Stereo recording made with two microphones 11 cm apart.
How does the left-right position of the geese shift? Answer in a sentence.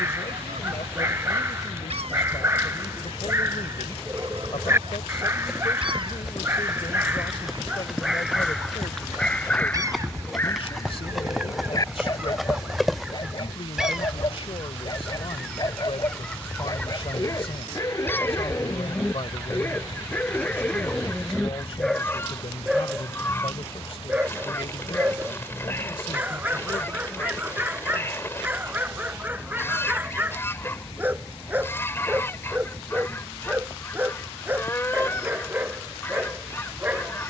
You can hear the geese go from the right side to the left.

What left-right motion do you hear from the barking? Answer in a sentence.
In this clip you hear the barking move from right to left and back again.